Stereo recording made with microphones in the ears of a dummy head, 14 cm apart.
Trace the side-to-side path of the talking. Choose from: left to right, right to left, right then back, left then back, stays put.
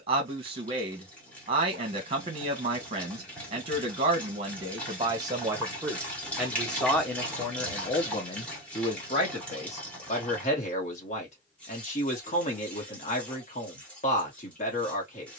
right to left.